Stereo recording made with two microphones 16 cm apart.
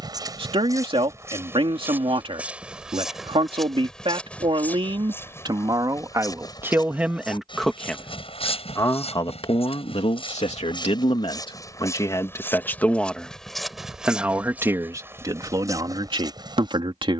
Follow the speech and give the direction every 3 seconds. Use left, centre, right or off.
right, right, centre, left, centre, right.